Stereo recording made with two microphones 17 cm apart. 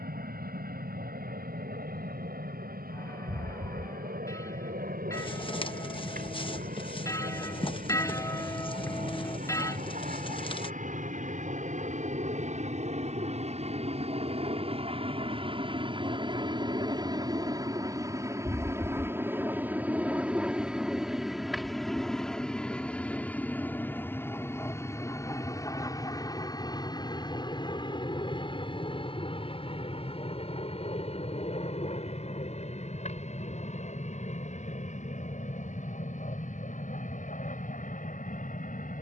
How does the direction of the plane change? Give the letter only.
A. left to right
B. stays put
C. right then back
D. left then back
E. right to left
E.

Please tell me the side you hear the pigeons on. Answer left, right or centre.
left.